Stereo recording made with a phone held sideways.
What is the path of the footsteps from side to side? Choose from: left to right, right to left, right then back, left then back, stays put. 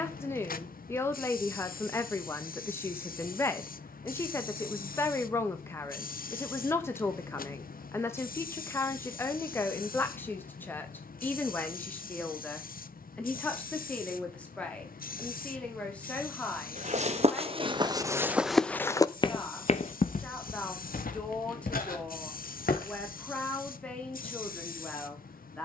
right to left.